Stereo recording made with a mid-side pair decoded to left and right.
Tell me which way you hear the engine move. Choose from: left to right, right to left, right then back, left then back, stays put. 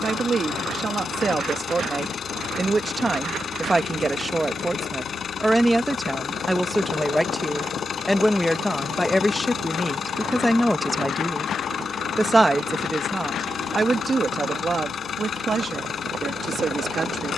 stays put.